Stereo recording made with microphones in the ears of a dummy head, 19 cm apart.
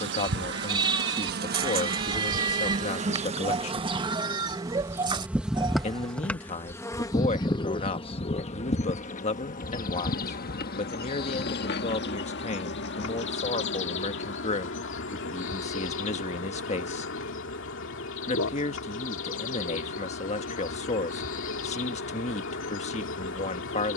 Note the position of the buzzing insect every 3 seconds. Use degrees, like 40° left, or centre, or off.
50° right, 20° right, 20° left, 40° left, 60° left, 60° left, 60° left, 60° left.